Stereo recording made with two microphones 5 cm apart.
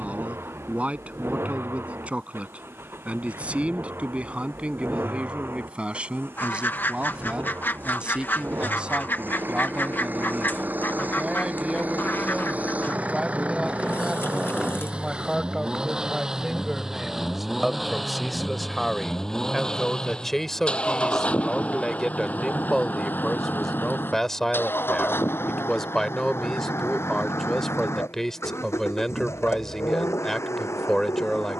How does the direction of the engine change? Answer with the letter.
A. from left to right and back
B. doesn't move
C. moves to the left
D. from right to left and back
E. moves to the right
C.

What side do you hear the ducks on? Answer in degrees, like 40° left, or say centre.
40° left.